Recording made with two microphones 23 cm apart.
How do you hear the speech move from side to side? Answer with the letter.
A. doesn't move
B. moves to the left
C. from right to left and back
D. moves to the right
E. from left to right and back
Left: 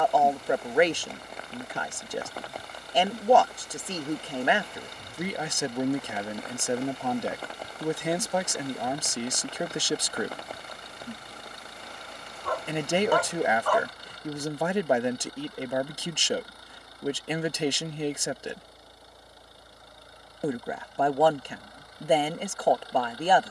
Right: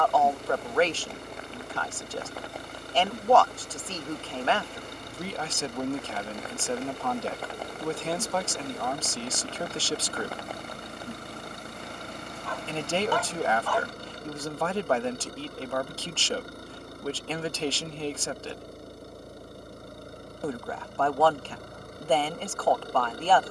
A.